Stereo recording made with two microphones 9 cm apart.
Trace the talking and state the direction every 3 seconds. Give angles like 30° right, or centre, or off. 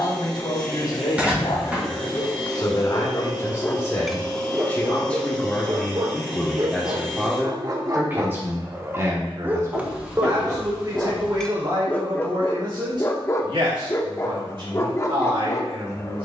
50° left, 20° left, 10° right, 40° right, 50° right, 60° right.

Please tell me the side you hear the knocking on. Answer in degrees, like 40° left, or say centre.
10° right.